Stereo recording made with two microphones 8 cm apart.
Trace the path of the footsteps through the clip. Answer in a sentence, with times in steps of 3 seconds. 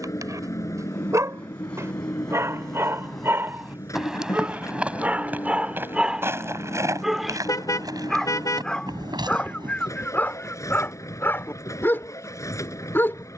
In this clip you hear the footsteps in the centre from 0 s, on the right from 6 s and not at all from 12 s.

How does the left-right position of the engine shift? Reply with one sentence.
In this clip you hear the engine stay put.